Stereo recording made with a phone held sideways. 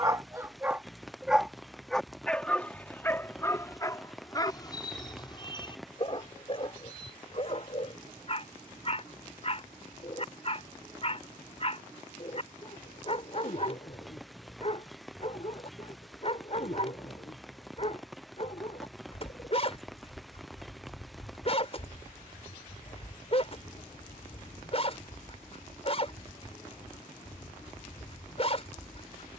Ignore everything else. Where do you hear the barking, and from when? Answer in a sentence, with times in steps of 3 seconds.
You can hear the barking in the centre from 0 s and on the left from 3 s.